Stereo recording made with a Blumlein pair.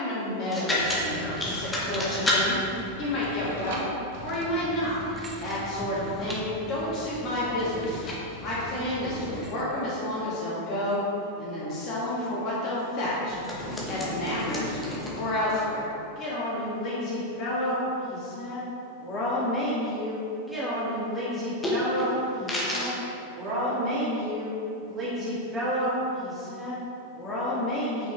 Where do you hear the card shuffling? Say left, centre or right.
centre.